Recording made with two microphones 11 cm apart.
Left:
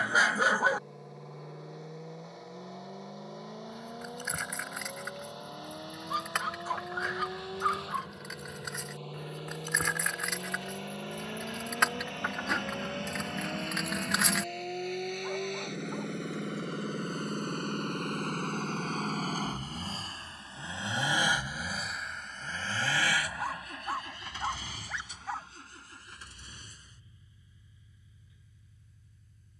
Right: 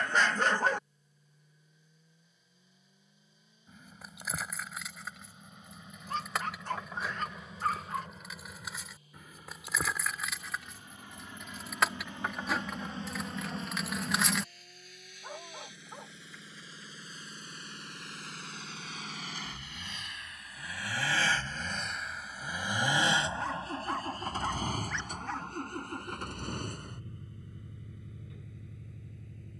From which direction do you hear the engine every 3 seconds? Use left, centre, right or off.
left, left, left, left, left, left, left, centre, right, right.